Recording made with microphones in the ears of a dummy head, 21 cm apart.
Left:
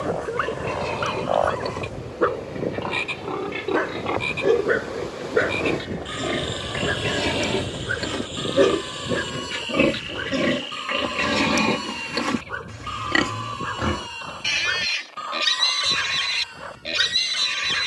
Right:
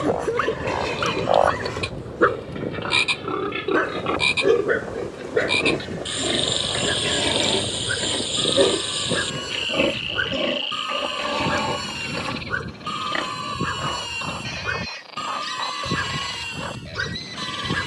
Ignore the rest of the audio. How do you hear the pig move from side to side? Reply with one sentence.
In this clip you hear the pig move to the left.